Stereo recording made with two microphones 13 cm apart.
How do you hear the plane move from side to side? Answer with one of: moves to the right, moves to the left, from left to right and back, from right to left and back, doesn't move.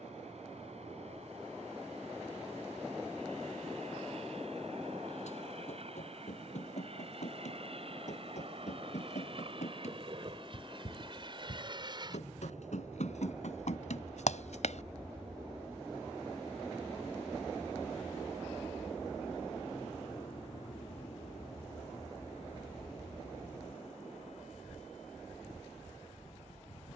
moves to the left.